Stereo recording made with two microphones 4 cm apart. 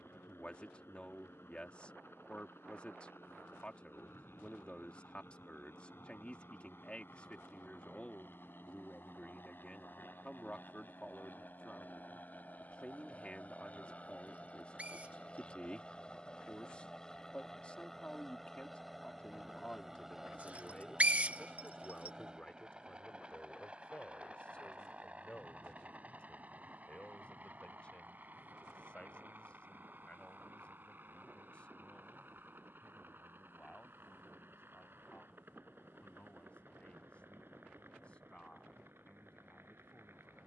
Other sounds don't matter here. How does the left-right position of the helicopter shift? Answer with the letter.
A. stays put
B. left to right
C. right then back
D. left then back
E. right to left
B.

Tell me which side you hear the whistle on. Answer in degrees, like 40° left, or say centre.
40° right.